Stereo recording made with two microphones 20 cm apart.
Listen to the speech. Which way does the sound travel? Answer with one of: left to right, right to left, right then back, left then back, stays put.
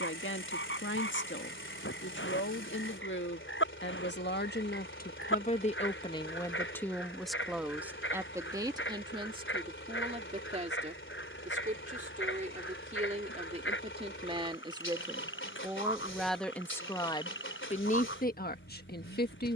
right then back.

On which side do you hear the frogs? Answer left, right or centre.
left.